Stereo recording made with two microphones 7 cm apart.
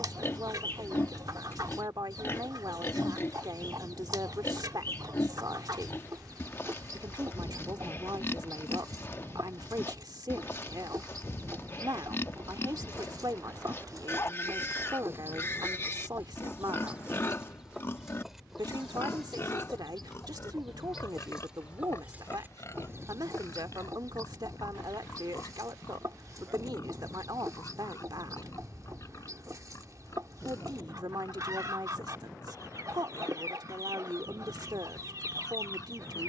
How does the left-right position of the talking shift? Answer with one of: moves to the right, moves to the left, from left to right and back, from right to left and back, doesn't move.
doesn't move.